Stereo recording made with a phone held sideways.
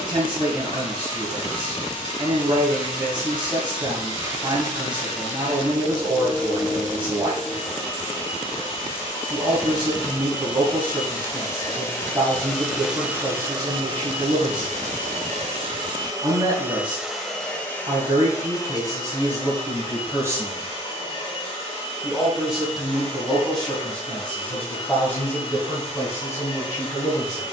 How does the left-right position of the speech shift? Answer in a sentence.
You can hear the speech go from the right side to the left.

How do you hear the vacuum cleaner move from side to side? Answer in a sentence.
You can hear the vacuum cleaner go right and come back.